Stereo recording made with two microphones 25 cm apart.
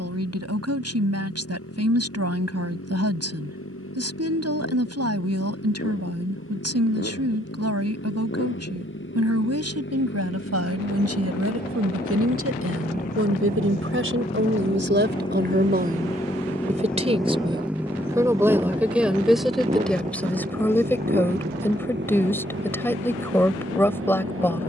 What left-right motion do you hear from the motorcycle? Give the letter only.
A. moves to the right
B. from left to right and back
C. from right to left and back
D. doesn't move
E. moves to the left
A.